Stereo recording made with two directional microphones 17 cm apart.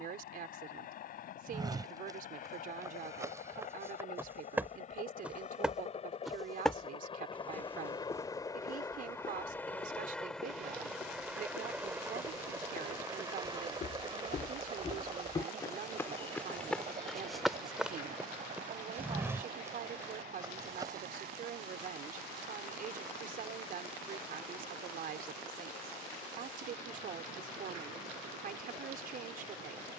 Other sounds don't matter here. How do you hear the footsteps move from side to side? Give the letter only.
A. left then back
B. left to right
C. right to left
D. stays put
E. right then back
A.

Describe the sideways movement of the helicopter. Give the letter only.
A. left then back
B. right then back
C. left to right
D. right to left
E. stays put
C.